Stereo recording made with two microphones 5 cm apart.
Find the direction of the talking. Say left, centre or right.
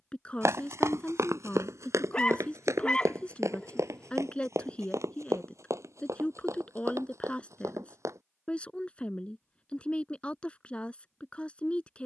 left.